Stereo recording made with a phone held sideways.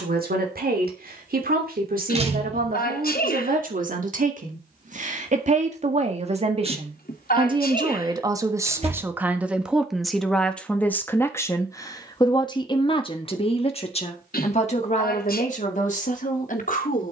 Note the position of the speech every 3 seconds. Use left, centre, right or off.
right, right, right, centre, left, left.